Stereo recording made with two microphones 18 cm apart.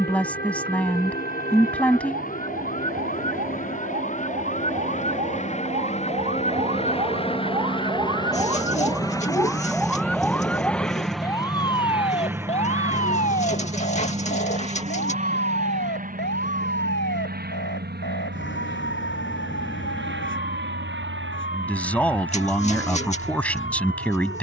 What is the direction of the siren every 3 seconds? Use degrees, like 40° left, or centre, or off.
60° right, 50° right, 30° right, 10° left, 40° left, 60° left, 70° left, 80° left.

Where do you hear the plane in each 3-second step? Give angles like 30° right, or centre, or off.
50° left, 40° left, 30° left, 10° left, 20° right, 40° right, 60° right, 70° right.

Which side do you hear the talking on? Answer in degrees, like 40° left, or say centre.
10° left.